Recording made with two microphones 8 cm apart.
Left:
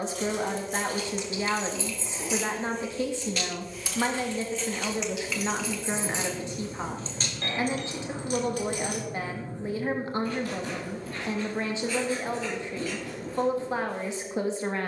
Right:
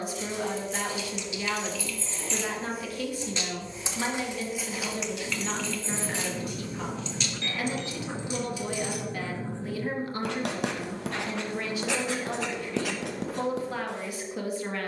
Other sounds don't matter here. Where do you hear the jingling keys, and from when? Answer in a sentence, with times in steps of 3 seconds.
You can hear the jingling keys on the left from 0 s, in the centre from 3 s, on the left from 6 s and not at all from 9 s.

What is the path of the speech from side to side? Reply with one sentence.
You can hear the speech stay in one place.